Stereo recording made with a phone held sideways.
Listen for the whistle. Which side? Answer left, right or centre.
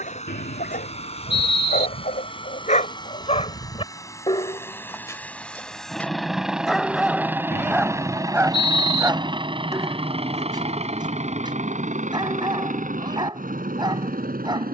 left.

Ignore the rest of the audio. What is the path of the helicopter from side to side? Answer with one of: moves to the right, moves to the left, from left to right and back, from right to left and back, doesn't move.
moves to the right.